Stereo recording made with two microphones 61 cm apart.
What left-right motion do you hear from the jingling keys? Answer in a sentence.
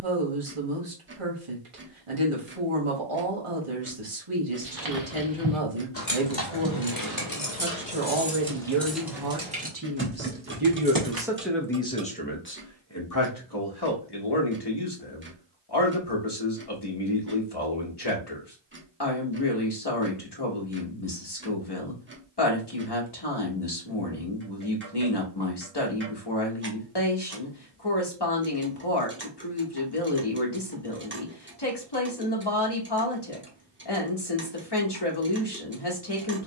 In this clip you hear the jingling keys move from right to left and back again.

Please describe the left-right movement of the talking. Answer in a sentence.
In this clip you hear the talking go from the right side to the left.